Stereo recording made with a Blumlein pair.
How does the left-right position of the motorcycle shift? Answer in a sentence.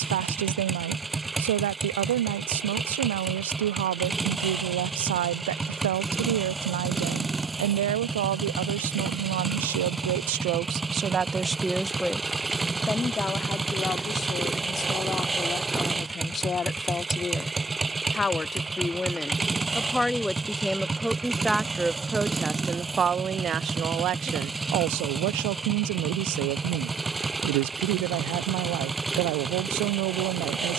You can hear the motorcycle stay put.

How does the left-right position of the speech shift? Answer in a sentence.
You can hear the speech move from right to left and back again.